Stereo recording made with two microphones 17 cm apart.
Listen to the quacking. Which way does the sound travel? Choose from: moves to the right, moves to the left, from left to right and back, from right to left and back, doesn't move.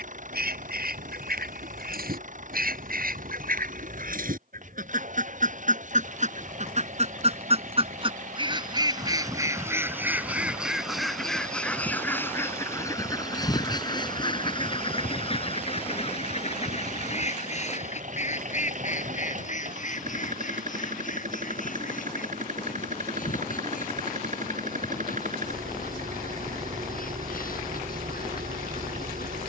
moves to the left.